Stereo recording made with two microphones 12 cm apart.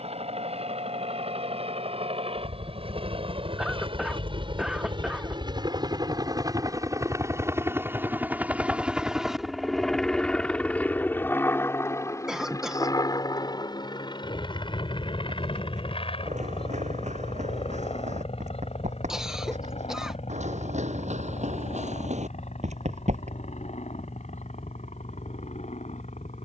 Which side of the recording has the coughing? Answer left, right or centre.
centre.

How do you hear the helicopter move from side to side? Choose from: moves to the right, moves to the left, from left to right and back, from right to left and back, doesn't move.
moves to the left.